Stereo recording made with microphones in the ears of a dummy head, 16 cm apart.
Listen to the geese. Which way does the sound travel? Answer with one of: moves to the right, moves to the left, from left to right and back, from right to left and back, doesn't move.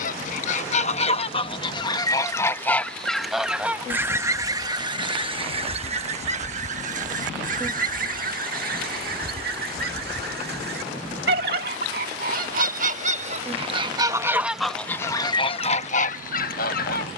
from left to right and back.